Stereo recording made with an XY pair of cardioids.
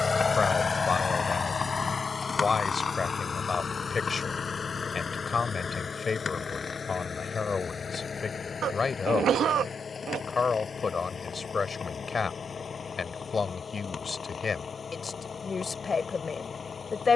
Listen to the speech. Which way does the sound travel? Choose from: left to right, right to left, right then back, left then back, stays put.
stays put.